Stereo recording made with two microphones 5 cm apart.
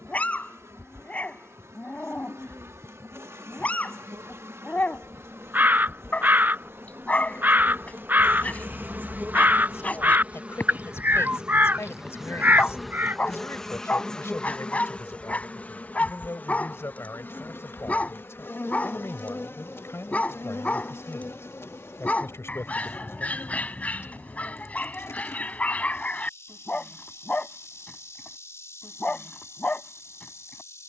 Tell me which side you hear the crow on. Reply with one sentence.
In this clip you hear the crow on the right.